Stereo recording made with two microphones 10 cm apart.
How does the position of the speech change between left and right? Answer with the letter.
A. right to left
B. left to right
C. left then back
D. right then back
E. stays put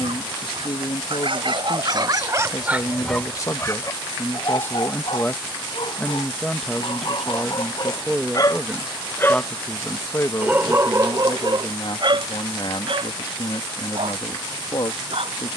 D.